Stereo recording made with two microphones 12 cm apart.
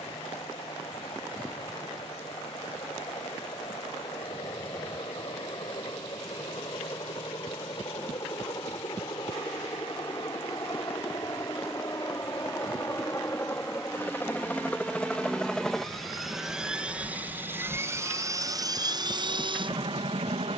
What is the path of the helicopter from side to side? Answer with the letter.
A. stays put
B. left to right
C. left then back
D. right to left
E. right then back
B.